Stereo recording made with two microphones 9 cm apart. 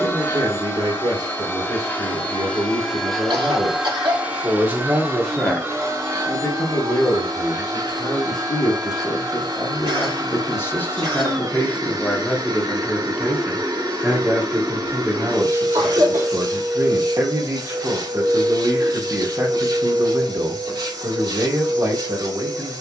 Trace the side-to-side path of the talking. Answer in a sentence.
You can hear the talking move from right to left and back again.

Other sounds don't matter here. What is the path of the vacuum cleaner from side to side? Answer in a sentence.
In this clip you hear the vacuum cleaner travel towards the right.